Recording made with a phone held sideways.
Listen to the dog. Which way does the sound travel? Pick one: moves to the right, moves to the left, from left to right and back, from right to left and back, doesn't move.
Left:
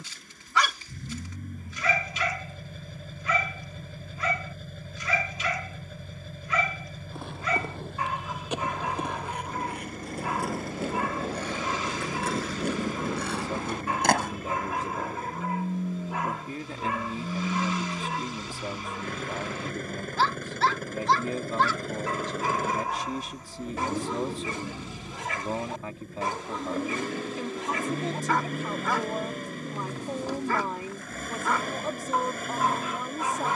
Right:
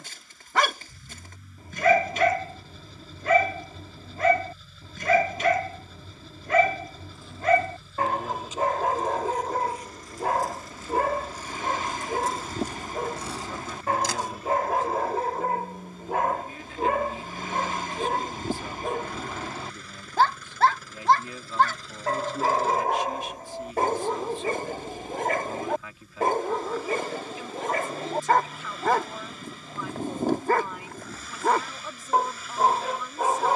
doesn't move.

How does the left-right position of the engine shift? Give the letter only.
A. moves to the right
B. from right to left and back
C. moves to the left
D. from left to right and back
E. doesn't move
E.